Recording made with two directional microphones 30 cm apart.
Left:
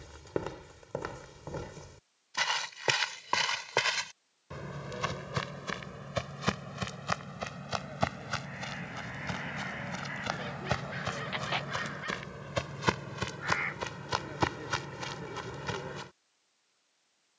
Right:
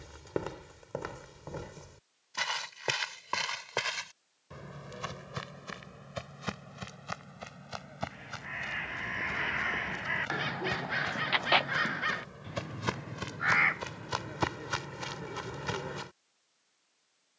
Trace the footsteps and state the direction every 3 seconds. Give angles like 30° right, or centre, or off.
10° left, 30° left, 50° left, 50° left, 20° left, 10° right.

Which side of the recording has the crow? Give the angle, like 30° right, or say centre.
60° right.